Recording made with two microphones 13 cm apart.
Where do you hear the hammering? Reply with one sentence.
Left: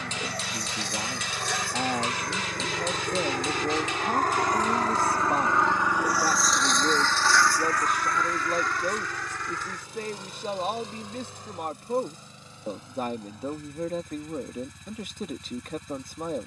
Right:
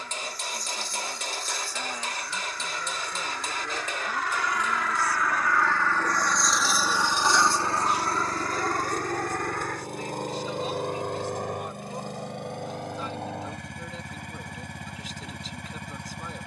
You can hear the hammering on the right.